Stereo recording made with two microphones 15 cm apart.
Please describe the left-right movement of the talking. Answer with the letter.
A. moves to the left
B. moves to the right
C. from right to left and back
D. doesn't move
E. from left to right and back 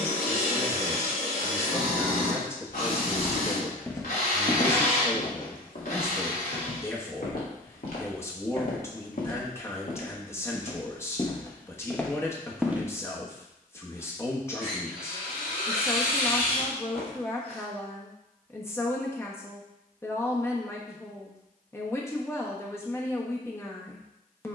D.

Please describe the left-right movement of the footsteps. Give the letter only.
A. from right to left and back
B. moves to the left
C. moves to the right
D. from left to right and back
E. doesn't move
A.